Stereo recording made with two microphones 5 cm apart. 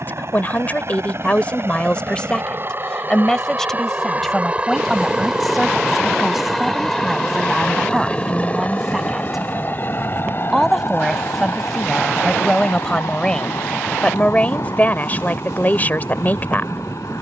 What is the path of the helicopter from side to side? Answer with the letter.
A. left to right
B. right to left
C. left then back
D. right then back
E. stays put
B.